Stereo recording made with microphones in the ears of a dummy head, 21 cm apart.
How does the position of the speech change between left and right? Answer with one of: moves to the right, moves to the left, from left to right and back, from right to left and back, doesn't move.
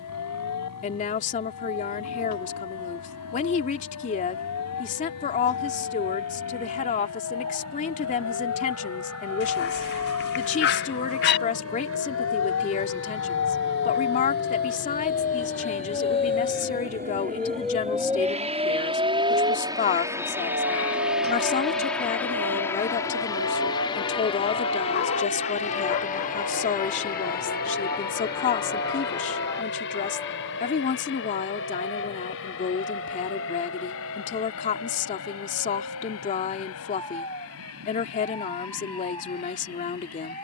doesn't move.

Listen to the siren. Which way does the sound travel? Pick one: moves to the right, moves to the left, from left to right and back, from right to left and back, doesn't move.
moves to the right.